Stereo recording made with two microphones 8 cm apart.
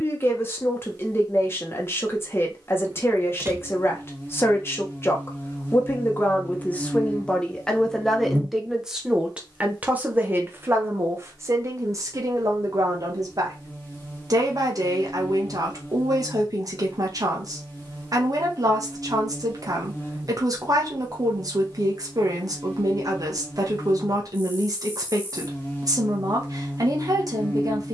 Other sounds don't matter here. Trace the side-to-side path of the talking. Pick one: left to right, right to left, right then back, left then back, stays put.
left to right.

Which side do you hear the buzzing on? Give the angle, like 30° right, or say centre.
30° left.